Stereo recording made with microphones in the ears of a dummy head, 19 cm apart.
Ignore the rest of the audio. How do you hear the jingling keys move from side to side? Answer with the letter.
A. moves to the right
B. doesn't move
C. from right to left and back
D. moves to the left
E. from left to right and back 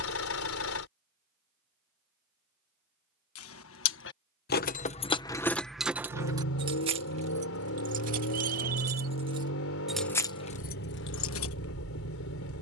E.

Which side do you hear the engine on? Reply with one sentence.
In this clip you hear the engine on the left.